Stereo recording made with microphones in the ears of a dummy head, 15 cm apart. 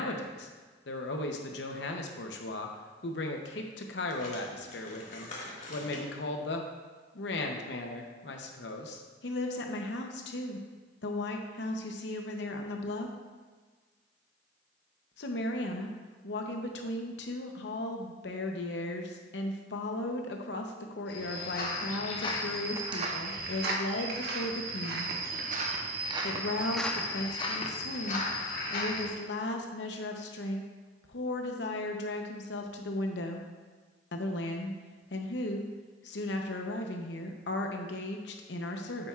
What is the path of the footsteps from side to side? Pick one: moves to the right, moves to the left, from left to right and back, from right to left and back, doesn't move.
from left to right and back.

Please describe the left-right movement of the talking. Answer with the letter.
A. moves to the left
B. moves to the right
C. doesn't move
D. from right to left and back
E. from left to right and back
C.